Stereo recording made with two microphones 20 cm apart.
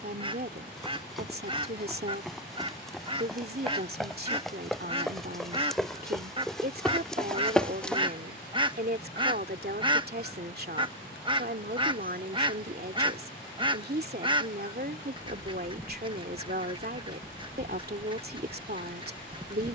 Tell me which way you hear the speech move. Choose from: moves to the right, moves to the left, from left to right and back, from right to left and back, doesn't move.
doesn't move.